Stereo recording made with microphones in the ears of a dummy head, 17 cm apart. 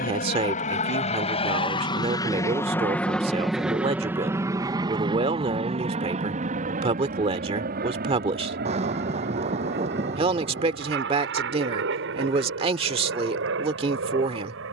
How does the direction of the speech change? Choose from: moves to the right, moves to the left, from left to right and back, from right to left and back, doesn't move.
doesn't move.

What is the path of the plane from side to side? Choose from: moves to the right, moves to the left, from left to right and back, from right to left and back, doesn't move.
moves to the right.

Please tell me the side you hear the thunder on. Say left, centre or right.
right.